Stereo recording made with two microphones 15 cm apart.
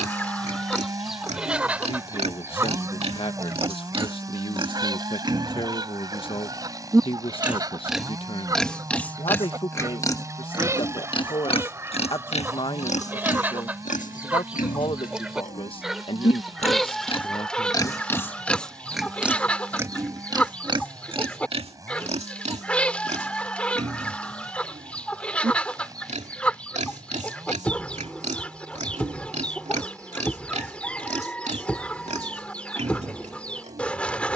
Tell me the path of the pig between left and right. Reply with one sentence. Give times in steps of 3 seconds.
You can hear the pig on the right from 0 s, in the centre from 6 s, on the left from 9 s, in the centre from 18 s and on the right from 21 s.